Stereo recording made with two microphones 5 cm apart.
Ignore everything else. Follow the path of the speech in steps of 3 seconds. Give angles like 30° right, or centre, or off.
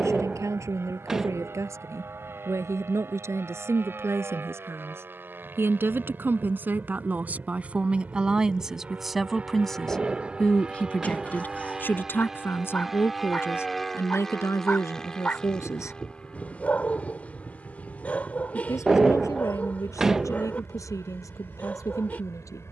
60° right, 50° right, 30° right, 20° left, 50° left, 60° left, 80° left, 80° left.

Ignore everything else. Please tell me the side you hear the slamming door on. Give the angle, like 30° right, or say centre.
10° right.